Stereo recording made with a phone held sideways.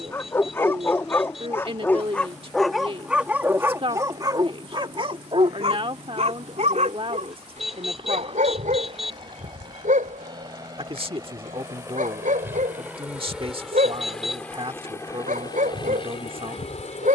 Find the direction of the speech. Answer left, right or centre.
right.